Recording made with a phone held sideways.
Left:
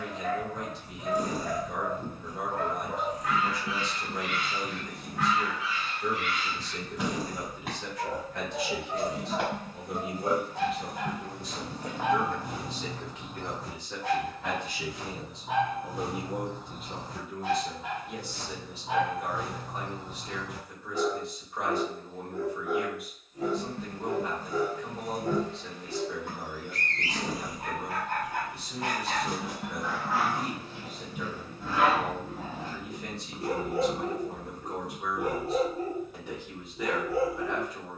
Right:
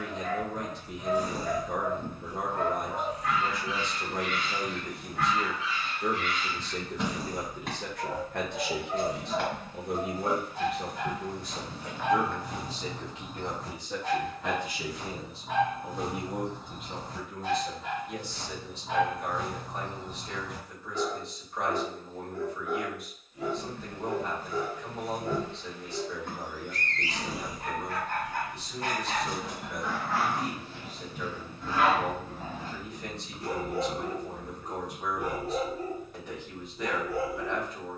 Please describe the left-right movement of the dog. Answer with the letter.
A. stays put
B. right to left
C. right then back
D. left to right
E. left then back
A.